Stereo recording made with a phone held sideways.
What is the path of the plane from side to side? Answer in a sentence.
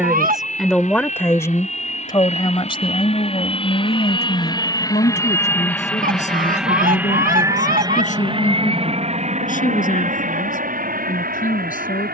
In this clip you hear the plane move to the right.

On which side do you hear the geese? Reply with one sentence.
You can hear the geese on the right.